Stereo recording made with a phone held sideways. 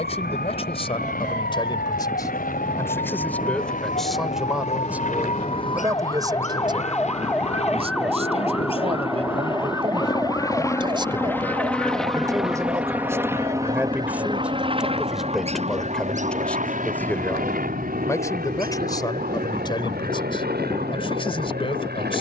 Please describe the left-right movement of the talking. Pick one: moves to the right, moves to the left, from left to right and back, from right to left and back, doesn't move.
from left to right and back.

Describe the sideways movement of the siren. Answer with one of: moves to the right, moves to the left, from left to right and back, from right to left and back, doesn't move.
moves to the right.